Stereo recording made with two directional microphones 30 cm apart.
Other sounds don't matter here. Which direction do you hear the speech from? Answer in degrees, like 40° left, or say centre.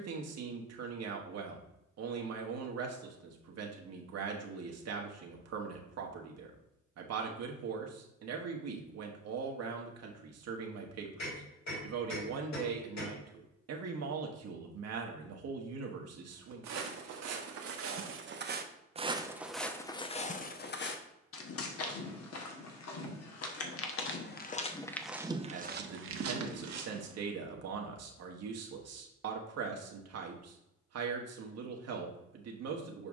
60° right.